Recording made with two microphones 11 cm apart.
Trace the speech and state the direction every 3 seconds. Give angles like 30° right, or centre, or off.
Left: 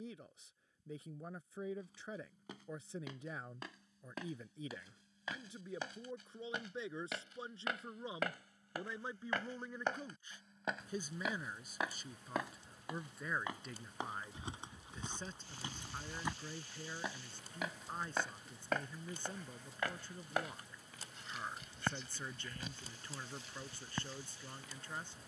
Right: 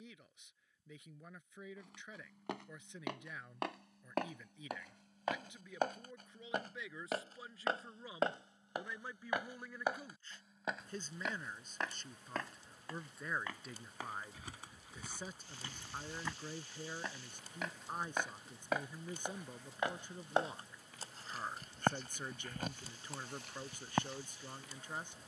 40° left, 30° left, 30° left, 10° left, centre, 10° right, 20° right, 20° right, 20° right.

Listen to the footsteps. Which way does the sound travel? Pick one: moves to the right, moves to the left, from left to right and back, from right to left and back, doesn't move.
from right to left and back.